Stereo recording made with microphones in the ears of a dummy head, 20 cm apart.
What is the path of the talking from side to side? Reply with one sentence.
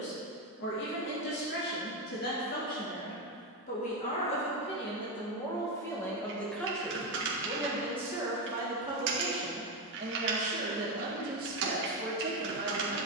You can hear the talking go from the left side to the right.